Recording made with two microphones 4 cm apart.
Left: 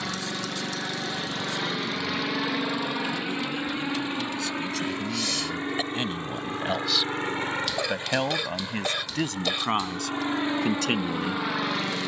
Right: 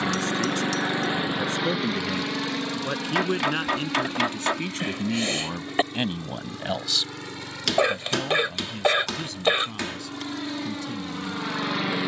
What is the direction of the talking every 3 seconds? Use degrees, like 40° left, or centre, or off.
50° right, 40° right, 20° left, 70° left.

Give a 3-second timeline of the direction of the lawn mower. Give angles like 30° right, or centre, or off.
10° right, 30° left, 40° left, 20° left.